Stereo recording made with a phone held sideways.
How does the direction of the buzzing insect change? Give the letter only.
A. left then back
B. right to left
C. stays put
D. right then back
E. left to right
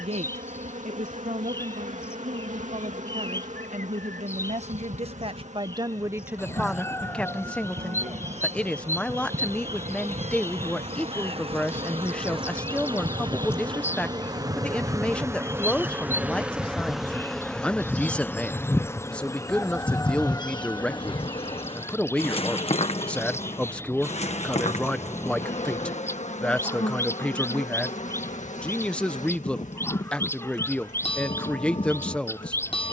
B.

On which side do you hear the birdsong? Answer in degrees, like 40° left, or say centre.
20° left.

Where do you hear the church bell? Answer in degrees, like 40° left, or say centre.
40° left.